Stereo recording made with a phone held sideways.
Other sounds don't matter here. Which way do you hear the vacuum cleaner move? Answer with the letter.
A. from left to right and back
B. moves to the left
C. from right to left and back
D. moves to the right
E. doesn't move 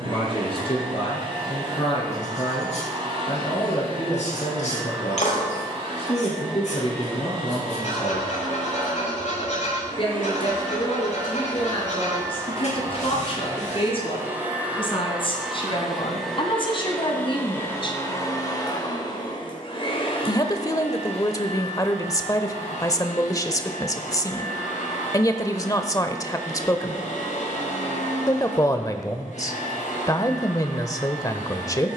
B.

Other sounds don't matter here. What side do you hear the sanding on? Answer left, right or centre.
left.